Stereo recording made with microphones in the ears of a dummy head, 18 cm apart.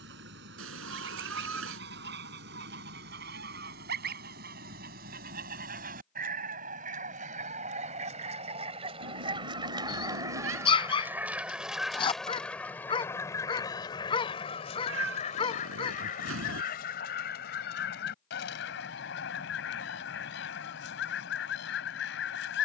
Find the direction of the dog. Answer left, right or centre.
left.